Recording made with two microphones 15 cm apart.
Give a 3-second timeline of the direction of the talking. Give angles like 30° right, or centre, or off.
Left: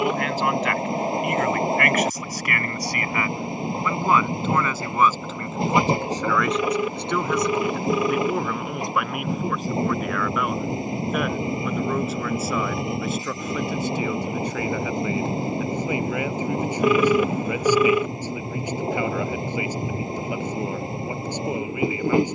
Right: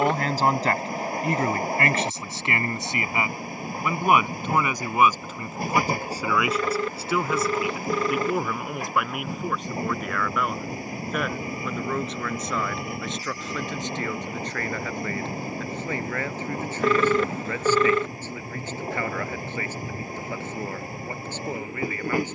30° right, 20° right, centre, centre, 10° left, 10° left, 10° left, 10° left.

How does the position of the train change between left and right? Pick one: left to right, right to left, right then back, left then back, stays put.
stays put.